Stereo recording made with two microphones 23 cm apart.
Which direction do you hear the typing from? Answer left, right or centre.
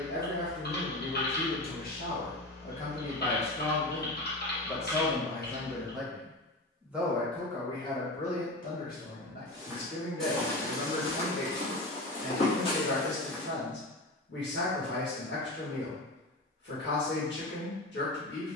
left.